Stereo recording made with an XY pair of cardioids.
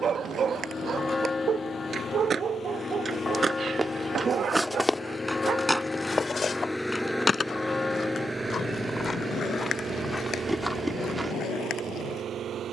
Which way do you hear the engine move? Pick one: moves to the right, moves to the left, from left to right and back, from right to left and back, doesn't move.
moves to the right.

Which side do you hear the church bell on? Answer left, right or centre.
left.